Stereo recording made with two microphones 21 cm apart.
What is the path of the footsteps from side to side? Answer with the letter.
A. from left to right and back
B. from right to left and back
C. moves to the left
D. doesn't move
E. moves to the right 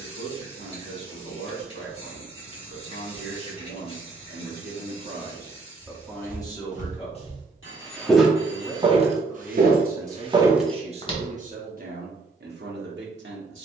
A.